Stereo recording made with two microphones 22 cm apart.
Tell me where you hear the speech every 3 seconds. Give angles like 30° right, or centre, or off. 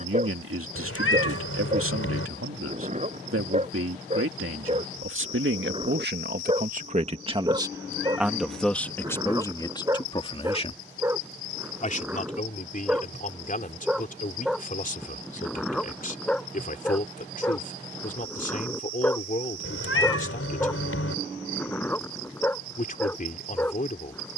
80° right, 70° right, 20° right, 20° left, 40° left, 40° left, 40° left, 40° left.